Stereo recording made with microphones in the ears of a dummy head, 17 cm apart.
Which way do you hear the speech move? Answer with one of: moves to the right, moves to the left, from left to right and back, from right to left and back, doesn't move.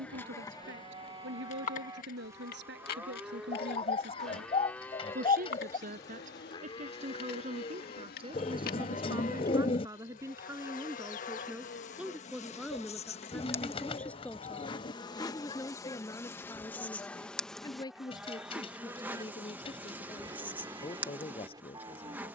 moves to the left.